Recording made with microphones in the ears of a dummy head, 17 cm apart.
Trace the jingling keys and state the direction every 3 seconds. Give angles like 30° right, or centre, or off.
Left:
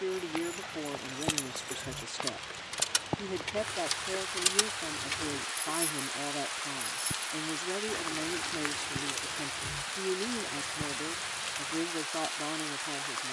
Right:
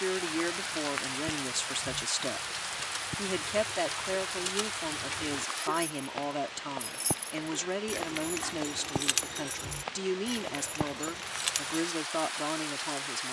60° left, 40° left, 40° right, 60° right, off.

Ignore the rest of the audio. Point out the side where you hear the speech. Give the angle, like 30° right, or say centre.
50° right.